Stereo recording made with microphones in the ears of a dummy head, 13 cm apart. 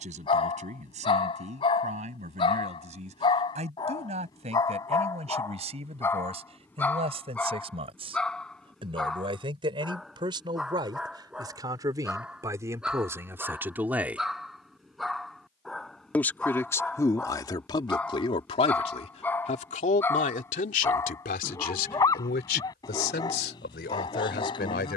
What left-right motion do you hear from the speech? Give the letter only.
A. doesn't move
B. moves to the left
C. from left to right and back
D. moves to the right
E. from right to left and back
B.